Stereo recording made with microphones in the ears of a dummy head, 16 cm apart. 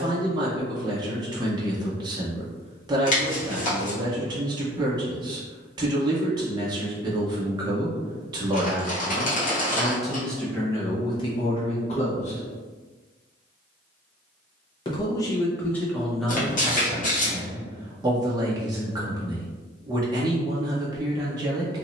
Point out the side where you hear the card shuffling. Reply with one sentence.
In this clip you hear the card shuffling on the left.